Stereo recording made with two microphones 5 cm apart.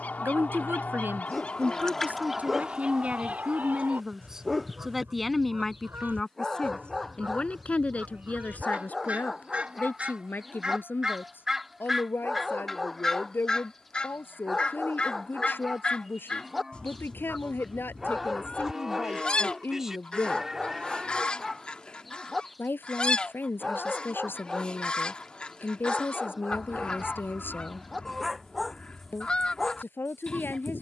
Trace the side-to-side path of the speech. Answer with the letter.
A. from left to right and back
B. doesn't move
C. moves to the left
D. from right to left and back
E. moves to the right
C.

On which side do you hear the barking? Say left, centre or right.
centre.